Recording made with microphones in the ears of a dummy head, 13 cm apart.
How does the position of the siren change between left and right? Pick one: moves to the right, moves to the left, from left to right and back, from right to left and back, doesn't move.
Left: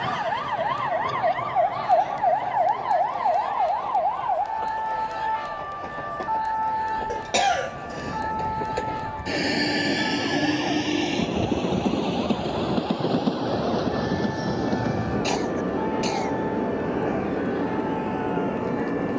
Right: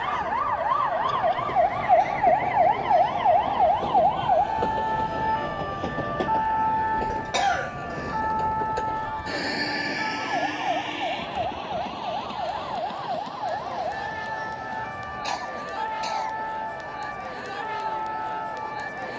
moves to the right.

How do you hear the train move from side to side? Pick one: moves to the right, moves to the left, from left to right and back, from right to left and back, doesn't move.
moves to the left.